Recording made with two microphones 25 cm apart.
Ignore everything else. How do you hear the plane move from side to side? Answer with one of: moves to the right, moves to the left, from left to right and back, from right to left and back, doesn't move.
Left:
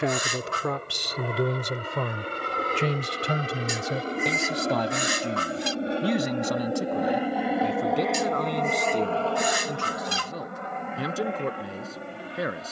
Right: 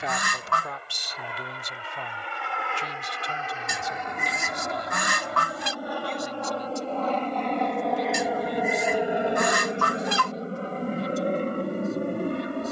moves to the right.